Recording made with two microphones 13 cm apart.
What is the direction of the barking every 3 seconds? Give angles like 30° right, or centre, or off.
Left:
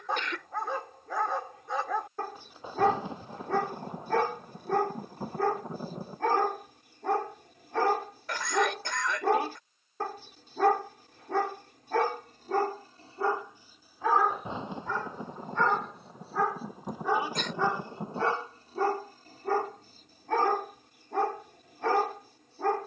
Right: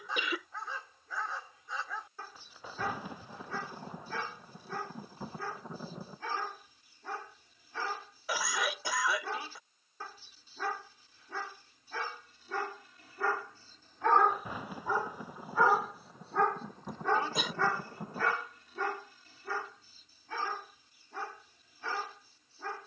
60° left, 60° left, 60° left, 60° left, 20° left, 10° left, 40° left, 60° left.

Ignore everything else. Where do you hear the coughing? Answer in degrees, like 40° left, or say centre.
10° right.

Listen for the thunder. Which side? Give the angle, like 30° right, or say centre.
20° left.